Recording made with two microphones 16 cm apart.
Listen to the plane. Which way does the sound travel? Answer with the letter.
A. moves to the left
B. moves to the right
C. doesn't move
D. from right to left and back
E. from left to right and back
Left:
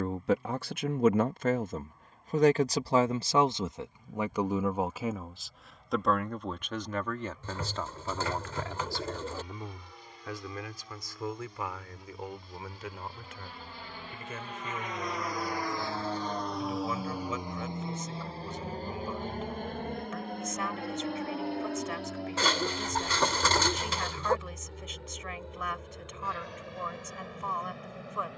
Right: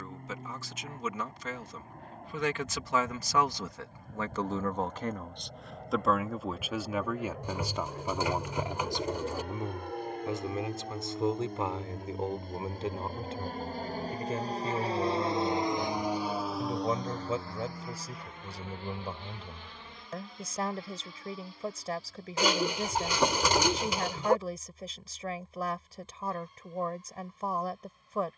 A.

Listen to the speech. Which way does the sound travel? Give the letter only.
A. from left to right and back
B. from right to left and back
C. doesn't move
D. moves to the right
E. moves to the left
D.